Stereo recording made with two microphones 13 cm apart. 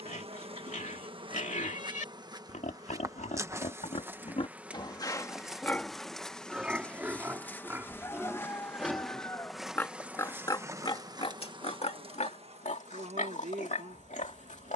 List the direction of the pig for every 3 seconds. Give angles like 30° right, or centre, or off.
70° left, 40° left, 10° right, 30° left, 70° left.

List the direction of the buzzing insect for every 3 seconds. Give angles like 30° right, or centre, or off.
40° right, 10° right, 10° left, 20° right, 50° right.